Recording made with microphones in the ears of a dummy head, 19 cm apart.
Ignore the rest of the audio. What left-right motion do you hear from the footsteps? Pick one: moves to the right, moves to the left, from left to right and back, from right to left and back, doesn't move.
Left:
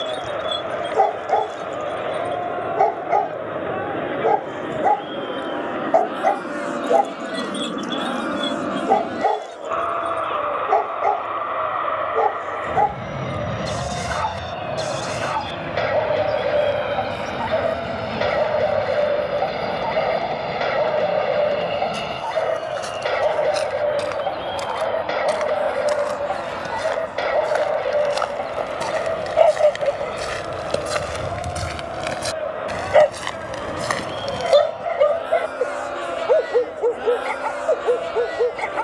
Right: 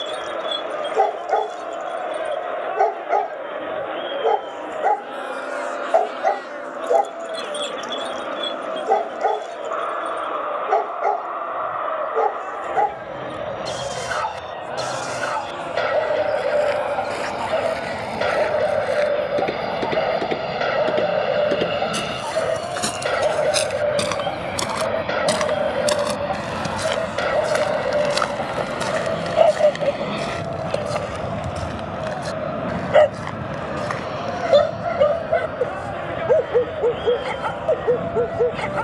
moves to the left.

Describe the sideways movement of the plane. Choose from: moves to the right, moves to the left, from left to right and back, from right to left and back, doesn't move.
moves to the right.